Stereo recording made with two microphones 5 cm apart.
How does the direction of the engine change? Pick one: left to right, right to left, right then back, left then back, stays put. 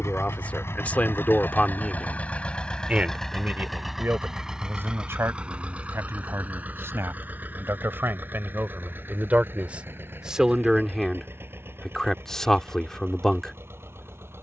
left to right.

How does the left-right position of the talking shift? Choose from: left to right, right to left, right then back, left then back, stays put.
right then back.